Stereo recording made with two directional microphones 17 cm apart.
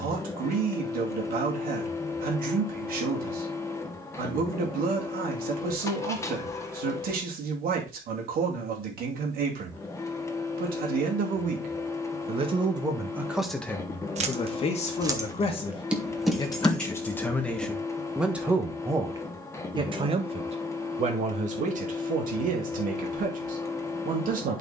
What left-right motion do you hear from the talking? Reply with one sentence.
You can hear the talking go left and come back.